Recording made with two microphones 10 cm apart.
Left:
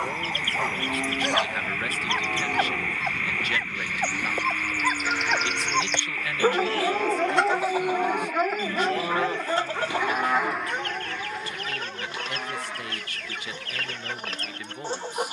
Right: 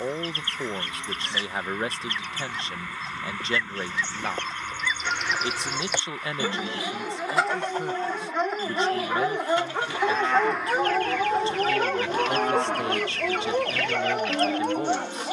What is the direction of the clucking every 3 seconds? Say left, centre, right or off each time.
left, centre, centre, left, left.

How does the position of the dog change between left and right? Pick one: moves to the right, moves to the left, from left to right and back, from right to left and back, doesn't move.
moves to the right.